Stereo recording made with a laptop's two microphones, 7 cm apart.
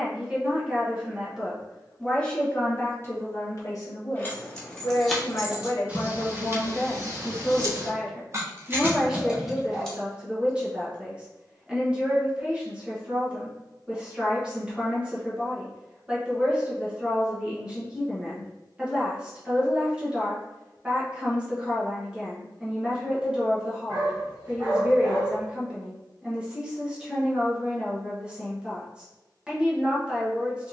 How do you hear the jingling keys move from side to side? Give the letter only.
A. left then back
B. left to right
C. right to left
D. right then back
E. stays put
D.